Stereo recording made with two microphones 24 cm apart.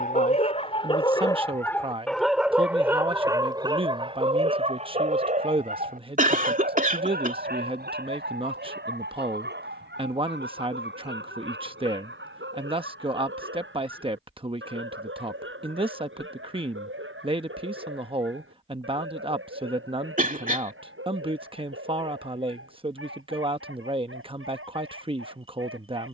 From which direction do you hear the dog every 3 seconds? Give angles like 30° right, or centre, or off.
10° left, 30° right, 50° right, 50° right, 60° right, 60° right, 60° right, 60° right, 70° right.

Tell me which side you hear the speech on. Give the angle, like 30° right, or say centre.
20° right.